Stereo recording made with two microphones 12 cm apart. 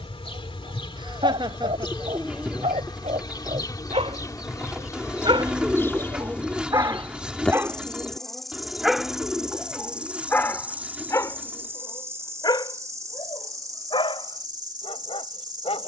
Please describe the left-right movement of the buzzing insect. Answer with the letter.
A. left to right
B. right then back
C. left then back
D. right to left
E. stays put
A.